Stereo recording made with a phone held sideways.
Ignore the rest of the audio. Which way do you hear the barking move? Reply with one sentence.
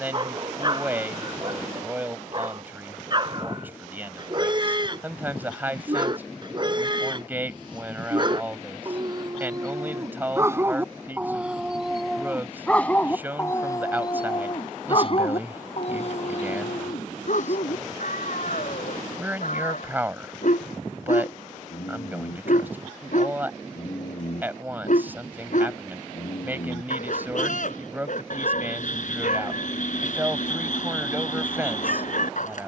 In this clip you hear the barking travel towards the left.